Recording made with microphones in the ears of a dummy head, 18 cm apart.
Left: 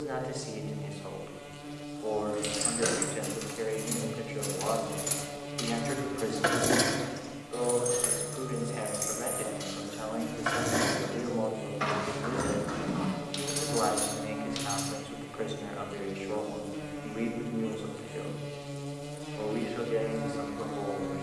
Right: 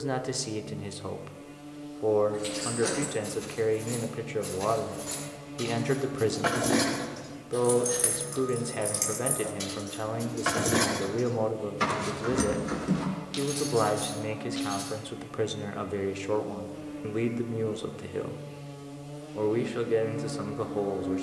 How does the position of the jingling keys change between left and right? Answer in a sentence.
You can hear the jingling keys move from left to right and back again.